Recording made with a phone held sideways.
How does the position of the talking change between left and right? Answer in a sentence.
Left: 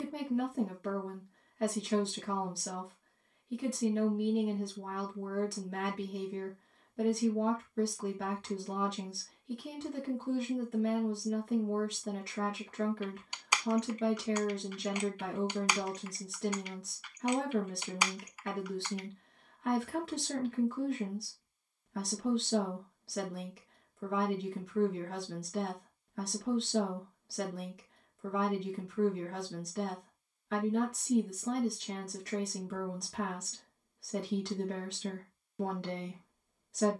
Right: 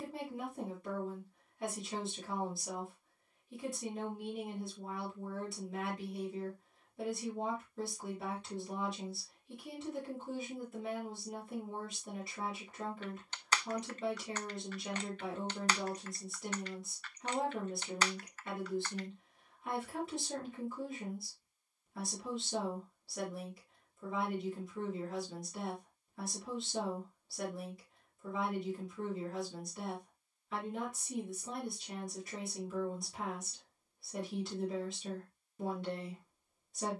In this clip you hear the talking stay in one place.